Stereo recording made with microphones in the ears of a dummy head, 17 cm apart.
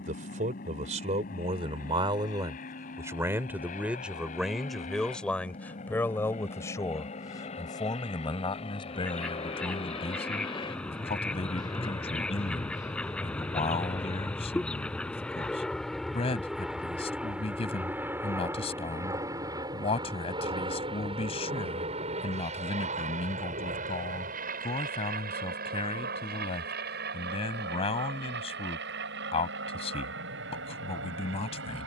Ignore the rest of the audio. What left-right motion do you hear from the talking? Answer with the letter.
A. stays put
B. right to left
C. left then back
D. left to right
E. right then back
B.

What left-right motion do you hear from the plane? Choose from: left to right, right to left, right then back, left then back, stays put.
left to right.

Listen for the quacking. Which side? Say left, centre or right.
centre.